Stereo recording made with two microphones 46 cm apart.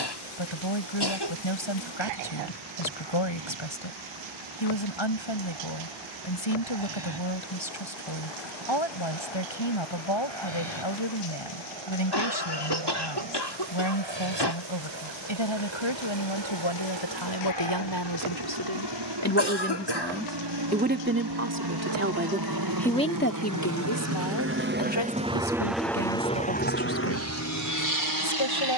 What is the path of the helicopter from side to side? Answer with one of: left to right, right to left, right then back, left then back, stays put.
right to left.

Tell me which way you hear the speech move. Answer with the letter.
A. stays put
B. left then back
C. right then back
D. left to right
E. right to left
C.